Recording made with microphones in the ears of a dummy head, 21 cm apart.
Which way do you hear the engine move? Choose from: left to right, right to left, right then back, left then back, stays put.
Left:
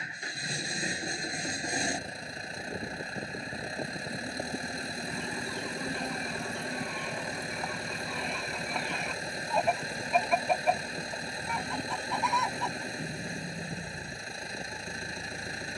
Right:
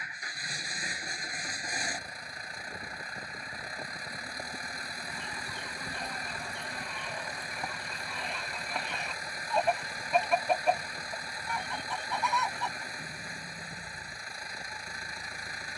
stays put.